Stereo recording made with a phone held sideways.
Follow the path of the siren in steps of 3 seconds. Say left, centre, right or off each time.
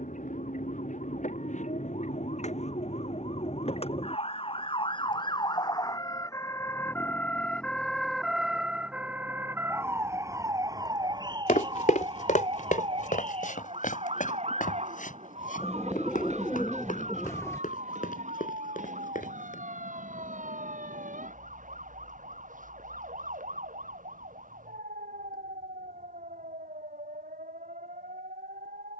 left, left, centre, right, right, right, right, right, right, right.